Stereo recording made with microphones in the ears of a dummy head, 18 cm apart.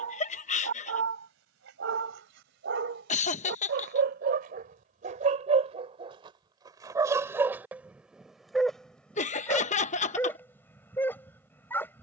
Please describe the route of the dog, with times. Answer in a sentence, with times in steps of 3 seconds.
You can hear the dog on the right from 0 s and in the centre from 6 s.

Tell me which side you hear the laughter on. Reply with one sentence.
You can hear the laughter on the left.